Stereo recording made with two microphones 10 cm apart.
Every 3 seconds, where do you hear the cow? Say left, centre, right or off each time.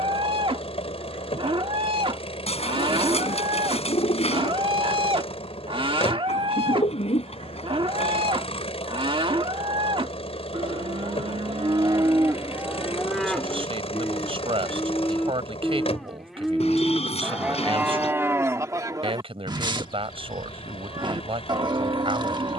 right, right, right, right, centre, centre, right, right.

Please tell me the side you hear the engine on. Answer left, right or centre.
left.